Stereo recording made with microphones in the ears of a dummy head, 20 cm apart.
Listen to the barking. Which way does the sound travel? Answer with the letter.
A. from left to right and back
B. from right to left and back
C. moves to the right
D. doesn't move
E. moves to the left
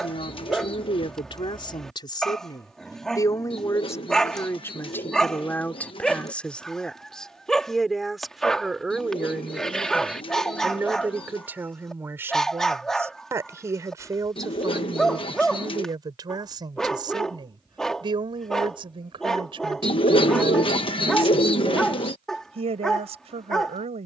D.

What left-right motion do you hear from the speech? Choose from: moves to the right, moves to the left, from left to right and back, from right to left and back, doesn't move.
moves to the right.